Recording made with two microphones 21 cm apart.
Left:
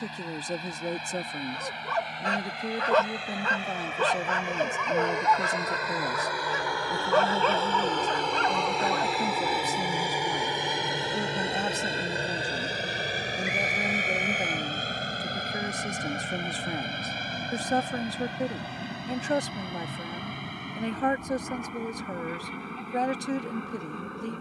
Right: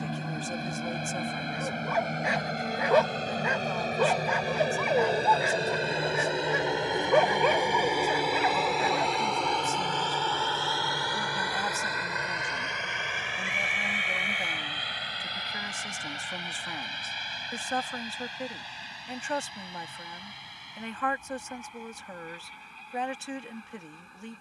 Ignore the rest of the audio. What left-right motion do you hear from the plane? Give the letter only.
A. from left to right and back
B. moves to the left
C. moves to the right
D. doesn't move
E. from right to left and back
B.